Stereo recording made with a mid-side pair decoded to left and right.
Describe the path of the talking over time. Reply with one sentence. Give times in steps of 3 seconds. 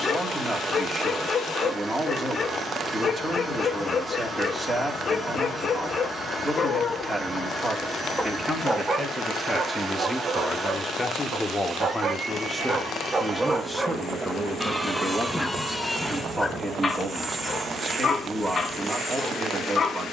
In this clip you hear the talking on the right from 0 s, in the centre from 9 s and on the right from 15 s.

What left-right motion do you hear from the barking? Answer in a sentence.
In this clip you hear the barking move from left to right and back again.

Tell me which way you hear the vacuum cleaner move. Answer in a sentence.
You can hear the vacuum cleaner stay in one place.